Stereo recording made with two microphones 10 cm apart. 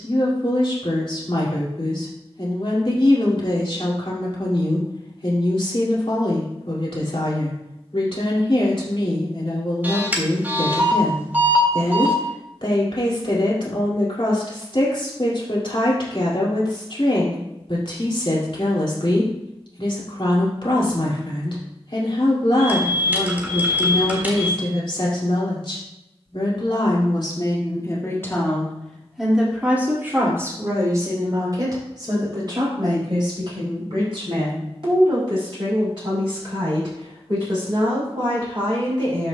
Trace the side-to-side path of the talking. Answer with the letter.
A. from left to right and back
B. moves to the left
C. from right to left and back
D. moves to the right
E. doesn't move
D.